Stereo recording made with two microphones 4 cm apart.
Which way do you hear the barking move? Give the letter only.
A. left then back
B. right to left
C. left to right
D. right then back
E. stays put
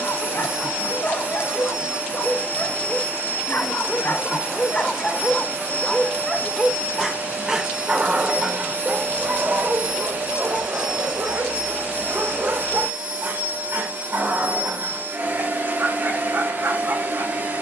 C.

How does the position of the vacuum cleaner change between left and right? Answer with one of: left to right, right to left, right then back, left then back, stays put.
stays put.